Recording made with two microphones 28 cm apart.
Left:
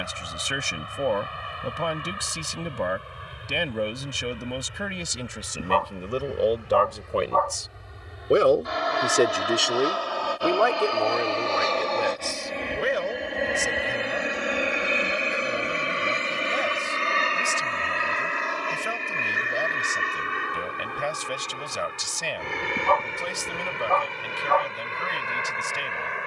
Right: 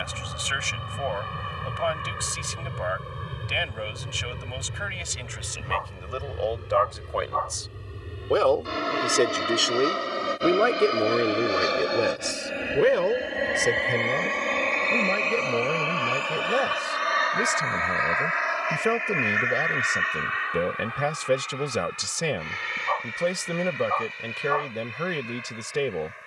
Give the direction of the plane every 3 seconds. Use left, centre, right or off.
right, right, right, right, centre, left, left, left, left.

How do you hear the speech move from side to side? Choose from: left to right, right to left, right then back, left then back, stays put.
left to right.